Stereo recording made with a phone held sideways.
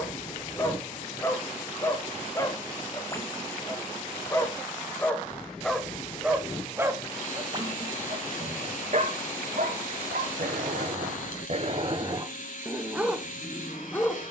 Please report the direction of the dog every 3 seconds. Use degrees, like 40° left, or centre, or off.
20° left, 10° left, 30° right, 60° right, centre.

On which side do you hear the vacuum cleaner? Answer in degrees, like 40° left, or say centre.
60° left.